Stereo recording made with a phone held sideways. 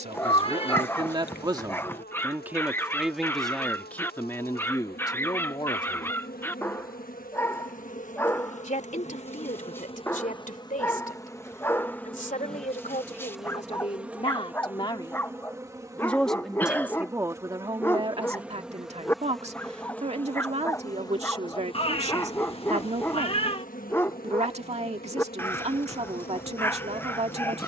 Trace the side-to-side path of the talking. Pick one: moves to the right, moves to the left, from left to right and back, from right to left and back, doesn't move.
from right to left and back.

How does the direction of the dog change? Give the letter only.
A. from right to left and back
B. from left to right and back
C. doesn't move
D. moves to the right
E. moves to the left
C.